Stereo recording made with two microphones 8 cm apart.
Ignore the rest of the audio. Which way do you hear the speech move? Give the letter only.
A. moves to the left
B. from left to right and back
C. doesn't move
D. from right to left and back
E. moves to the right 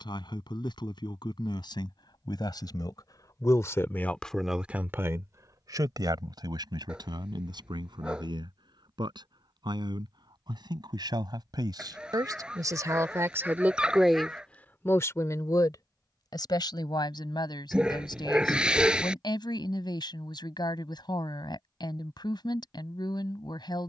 B.